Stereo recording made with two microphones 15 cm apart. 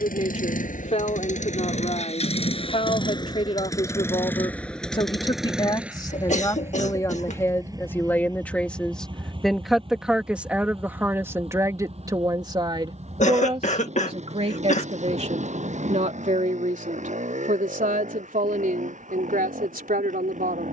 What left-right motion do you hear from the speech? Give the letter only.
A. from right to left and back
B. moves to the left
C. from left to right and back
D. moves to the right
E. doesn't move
D.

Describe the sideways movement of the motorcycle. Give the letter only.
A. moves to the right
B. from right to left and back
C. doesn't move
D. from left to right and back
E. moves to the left
A.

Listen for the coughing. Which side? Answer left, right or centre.
left.